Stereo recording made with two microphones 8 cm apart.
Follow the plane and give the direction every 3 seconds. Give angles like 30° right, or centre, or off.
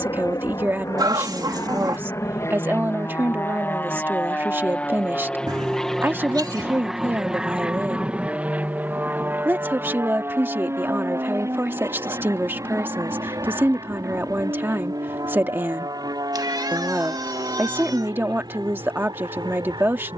40° left, 20° left, 10° right, 30° right, 40° right, 50° right, 60° right.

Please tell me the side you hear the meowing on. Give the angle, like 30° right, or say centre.
60° right.